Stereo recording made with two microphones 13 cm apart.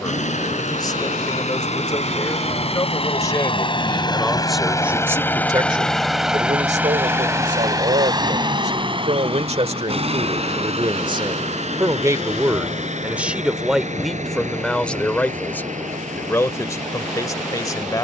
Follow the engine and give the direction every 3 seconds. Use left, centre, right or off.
left, left, right, right, right, right.